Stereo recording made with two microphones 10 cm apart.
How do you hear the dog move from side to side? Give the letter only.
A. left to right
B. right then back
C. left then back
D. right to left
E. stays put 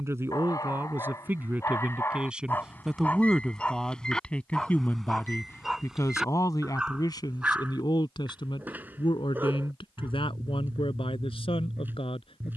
A.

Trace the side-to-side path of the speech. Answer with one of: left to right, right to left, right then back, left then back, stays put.
right to left.